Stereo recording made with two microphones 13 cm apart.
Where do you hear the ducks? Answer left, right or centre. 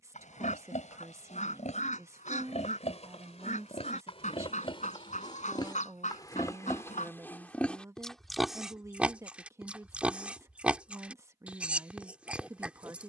left.